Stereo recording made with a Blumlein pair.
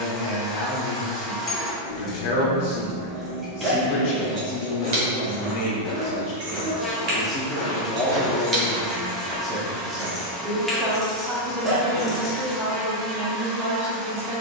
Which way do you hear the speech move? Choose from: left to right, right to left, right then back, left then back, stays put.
left to right.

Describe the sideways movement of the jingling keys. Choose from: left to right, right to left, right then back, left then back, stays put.
right then back.